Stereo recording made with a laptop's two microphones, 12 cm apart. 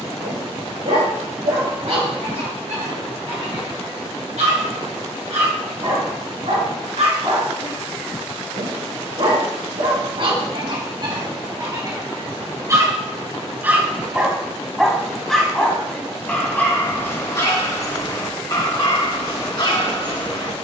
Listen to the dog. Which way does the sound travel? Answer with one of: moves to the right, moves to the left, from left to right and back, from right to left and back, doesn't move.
moves to the left.